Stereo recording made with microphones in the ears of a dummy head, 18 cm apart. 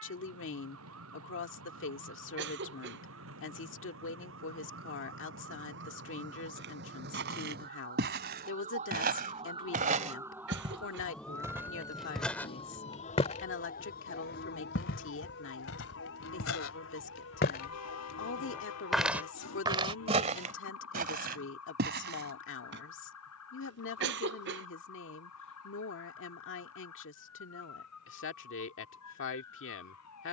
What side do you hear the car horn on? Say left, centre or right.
left.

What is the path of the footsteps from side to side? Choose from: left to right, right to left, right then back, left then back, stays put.
left then back.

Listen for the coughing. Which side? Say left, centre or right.
right.